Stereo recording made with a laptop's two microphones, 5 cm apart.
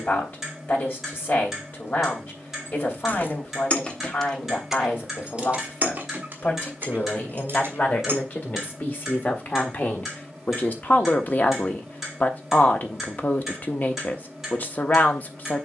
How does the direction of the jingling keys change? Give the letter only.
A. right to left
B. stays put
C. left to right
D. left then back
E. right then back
C.